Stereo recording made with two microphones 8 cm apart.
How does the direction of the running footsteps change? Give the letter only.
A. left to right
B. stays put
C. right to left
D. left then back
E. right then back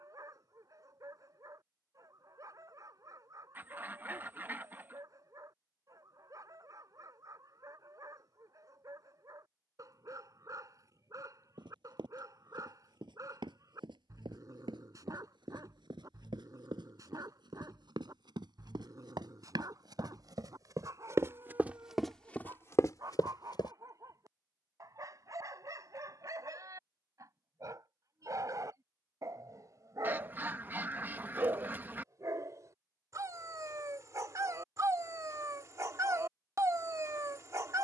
C.